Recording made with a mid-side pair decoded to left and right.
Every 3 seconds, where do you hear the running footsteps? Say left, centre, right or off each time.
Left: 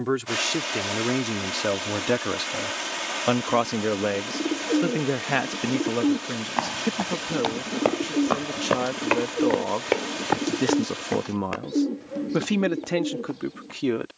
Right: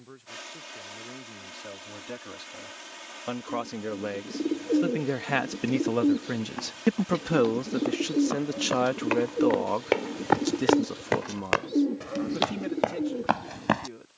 off, off, left, centre, right.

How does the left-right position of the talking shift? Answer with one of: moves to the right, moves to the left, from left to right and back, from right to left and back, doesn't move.
from left to right and back.